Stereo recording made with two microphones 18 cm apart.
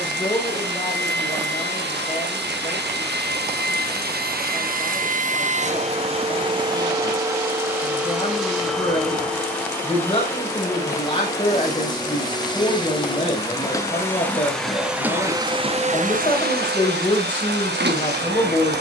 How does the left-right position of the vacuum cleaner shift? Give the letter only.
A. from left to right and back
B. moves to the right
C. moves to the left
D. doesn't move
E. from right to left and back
E.